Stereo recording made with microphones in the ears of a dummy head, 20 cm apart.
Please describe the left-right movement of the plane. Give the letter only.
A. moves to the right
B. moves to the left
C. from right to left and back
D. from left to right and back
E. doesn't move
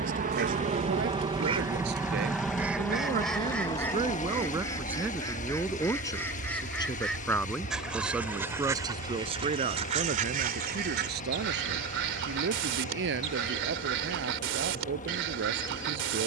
B.